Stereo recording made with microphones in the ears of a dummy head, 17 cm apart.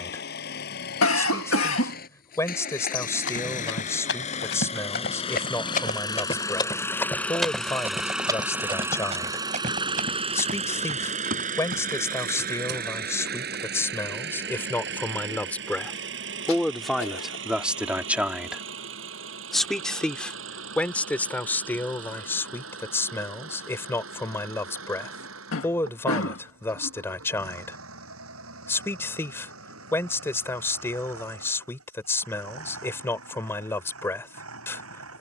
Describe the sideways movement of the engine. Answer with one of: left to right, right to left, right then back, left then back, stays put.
left to right.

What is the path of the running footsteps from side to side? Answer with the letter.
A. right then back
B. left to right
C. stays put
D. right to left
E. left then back
B.